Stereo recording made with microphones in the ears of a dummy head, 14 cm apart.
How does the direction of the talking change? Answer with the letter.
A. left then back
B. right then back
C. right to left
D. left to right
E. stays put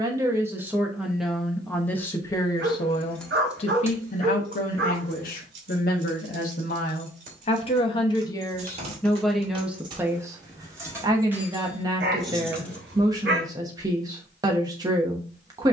A.